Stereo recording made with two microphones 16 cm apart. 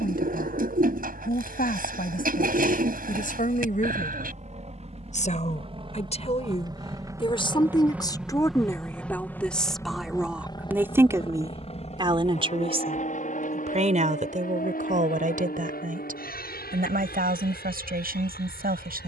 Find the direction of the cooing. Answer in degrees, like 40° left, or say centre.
60° right.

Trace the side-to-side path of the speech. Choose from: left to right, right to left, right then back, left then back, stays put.
left to right.